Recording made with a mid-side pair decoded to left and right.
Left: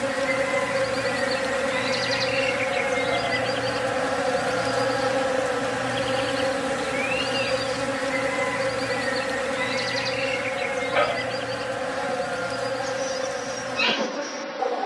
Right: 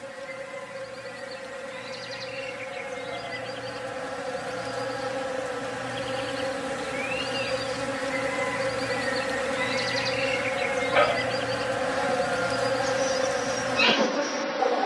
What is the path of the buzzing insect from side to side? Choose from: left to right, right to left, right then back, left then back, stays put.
left to right.